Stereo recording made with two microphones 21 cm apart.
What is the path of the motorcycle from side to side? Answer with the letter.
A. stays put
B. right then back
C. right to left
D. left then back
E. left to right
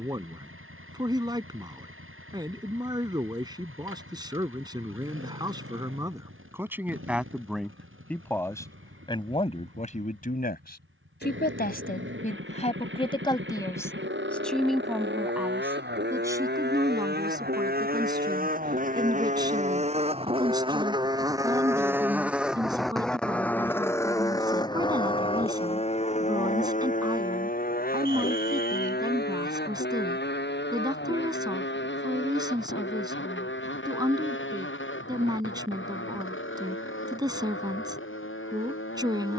C.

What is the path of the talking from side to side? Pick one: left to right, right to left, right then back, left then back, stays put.
left then back.